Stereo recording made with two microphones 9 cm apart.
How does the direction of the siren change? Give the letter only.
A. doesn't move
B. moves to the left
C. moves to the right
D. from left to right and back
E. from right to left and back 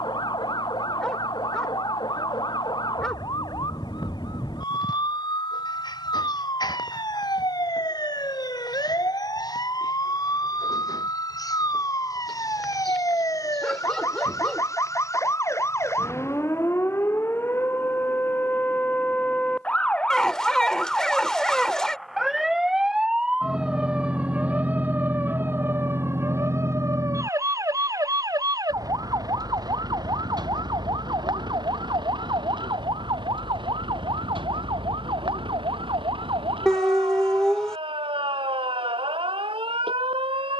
C.